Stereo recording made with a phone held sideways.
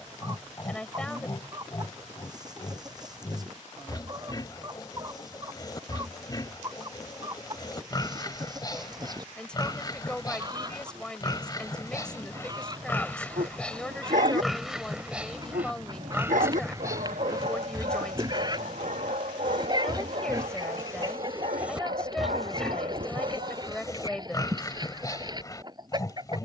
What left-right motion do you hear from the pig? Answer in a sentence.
In this clip you hear the pig go right and come back.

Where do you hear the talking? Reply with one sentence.
In this clip you hear the talking in the centre.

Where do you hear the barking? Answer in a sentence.
In this clip you hear the barking on the right.